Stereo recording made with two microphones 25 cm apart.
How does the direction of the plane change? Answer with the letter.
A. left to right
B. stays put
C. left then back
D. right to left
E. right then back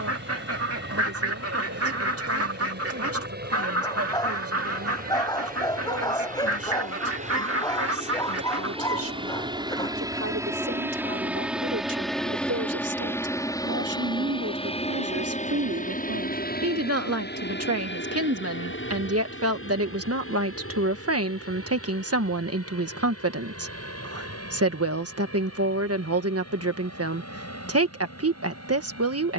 D.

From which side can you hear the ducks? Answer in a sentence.
In this clip you hear the ducks on the right.